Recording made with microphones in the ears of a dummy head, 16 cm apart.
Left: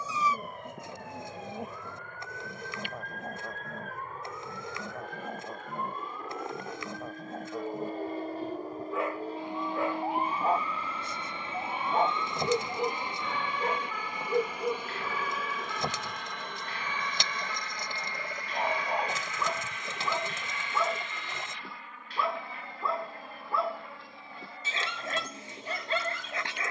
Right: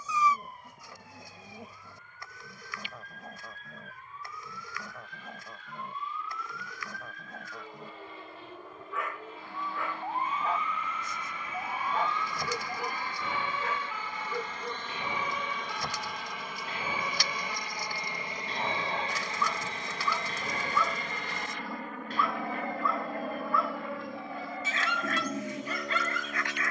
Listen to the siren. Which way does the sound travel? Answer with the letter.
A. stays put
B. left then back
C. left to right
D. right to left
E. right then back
C.